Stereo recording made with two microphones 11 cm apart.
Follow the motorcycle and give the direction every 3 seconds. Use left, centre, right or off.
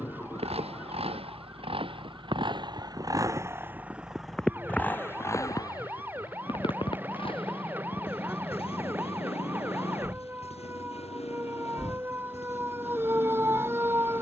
right, centre, left, left, left.